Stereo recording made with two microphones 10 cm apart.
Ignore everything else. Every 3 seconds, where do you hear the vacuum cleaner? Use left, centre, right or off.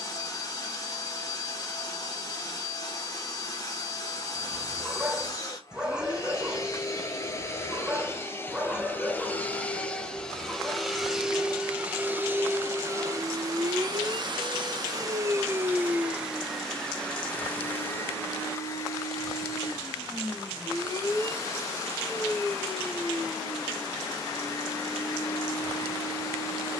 left, left, left, centre, right, centre, left, left, left.